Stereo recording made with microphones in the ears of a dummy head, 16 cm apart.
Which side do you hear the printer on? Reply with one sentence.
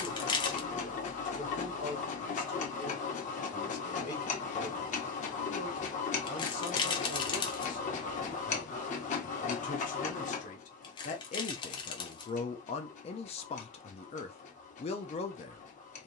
In this clip you hear the printer on the left.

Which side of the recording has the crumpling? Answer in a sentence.
In this clip you hear the crumpling on the left.